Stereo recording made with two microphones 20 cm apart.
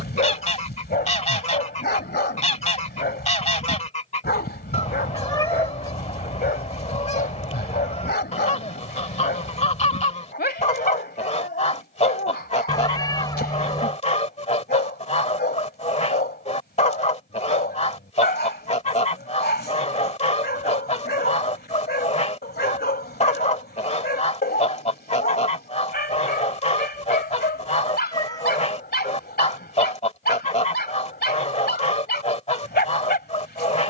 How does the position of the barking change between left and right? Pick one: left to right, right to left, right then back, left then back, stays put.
stays put.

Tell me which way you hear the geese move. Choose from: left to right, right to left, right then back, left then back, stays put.
stays put.